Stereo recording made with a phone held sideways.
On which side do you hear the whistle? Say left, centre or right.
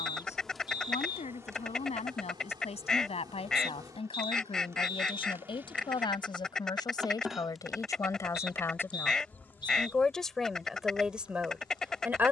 left.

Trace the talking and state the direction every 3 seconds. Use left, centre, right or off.
left, left, left, centre.